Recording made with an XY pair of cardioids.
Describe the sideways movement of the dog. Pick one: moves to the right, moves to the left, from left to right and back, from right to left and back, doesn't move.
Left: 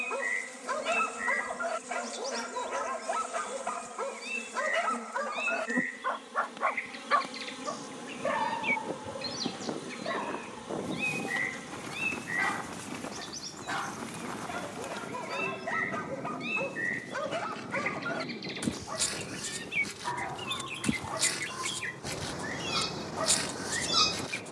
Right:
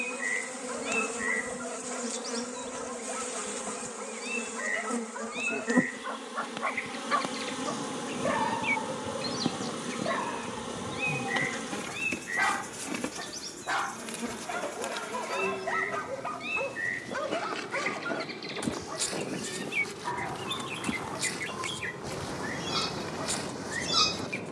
from left to right and back.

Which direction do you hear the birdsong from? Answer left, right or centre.
centre.